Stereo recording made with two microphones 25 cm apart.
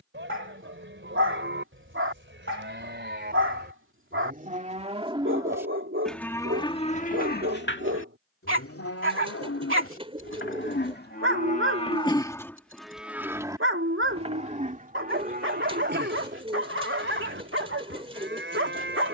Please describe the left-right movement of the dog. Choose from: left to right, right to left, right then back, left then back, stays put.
stays put.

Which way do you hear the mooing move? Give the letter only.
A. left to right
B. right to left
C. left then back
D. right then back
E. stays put
C.